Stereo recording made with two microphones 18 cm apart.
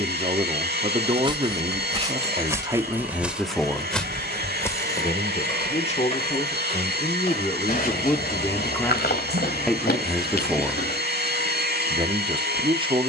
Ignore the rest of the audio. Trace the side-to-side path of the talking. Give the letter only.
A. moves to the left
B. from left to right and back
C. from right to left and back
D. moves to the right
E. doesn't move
C.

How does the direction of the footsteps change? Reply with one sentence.
You can hear the footsteps move from right to left.